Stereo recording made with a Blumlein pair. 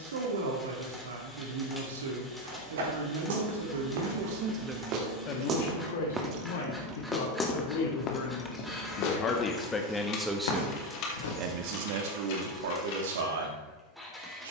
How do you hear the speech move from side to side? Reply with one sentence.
You can hear the speech move from right to left and back again.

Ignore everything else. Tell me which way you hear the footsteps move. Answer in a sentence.
You can hear the footsteps move from right to left.